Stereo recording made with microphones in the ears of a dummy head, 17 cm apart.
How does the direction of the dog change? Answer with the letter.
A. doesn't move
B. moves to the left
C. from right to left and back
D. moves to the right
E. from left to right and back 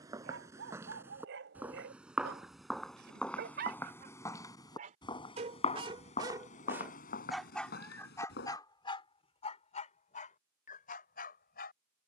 B.